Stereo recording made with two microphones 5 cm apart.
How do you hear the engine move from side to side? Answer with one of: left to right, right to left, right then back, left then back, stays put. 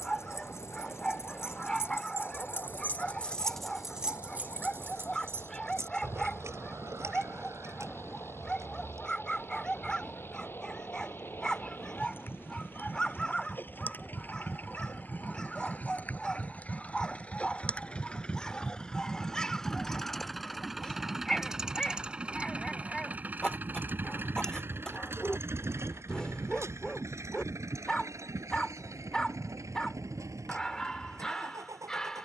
left to right.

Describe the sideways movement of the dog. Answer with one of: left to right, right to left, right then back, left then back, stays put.
stays put.